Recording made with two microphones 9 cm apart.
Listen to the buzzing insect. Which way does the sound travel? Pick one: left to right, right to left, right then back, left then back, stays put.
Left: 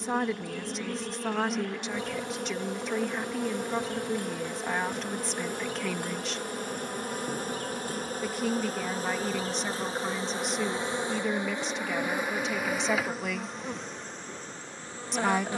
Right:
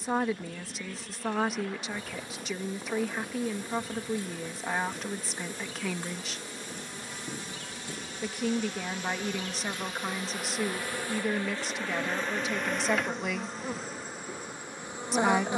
left to right.